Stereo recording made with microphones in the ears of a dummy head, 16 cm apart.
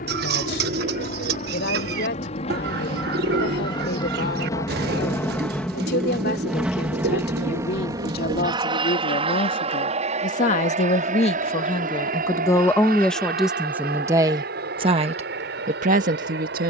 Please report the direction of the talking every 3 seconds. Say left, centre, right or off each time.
left, left, left, left, centre, right.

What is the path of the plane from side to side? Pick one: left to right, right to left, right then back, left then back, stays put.
left to right.